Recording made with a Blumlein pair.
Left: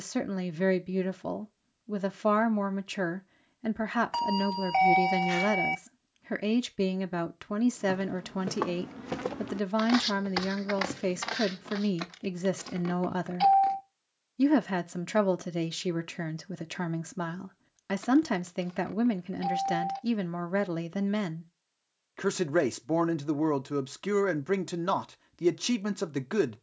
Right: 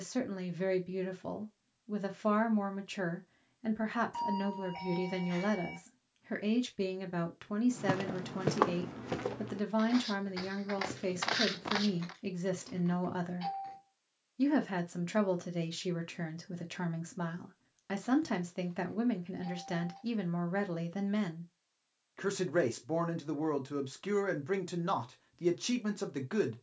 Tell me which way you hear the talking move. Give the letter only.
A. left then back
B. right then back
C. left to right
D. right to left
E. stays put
E.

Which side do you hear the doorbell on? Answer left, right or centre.
left.